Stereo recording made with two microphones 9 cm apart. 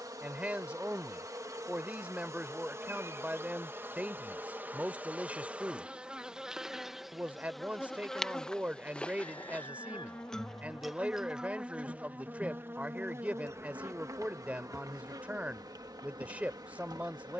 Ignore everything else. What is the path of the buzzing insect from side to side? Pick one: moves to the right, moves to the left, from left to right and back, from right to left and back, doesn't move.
from right to left and back.